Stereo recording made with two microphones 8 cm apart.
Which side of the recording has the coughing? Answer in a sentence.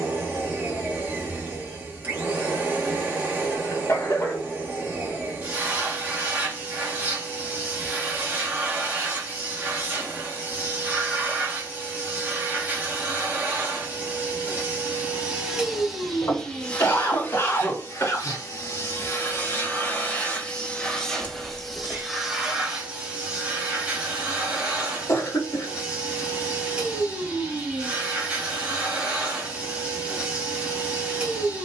In this clip you hear the coughing on the left.